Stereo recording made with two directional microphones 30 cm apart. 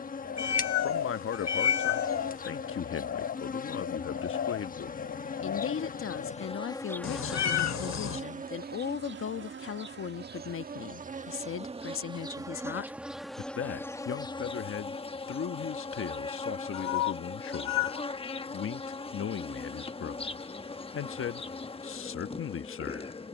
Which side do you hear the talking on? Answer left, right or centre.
left.